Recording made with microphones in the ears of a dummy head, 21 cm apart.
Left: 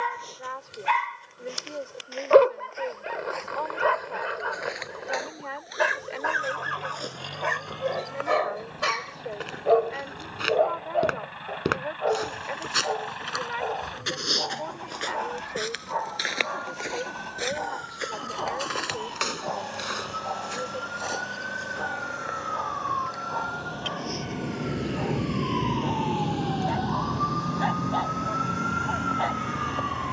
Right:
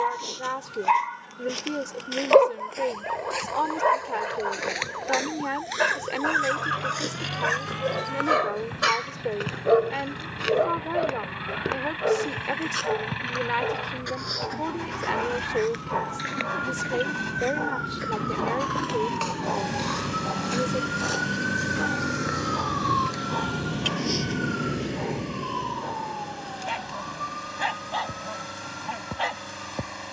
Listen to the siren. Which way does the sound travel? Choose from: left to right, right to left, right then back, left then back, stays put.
right to left.